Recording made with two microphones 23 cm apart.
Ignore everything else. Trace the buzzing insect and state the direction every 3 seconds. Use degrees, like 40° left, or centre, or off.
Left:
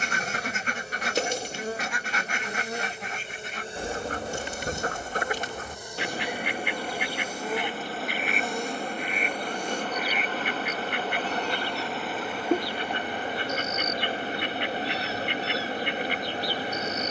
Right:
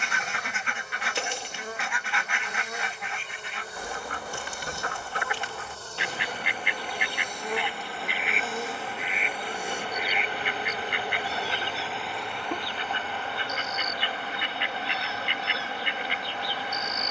30° left, 20° left, centre, 10° right, 20° left, 30° left.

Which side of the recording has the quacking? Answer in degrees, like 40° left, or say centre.
40° left.